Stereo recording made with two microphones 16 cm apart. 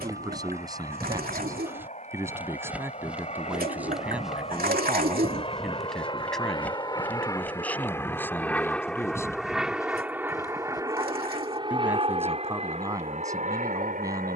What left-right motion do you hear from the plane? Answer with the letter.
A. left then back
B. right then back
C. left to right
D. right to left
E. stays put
C.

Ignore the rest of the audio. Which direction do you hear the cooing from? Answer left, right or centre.
right.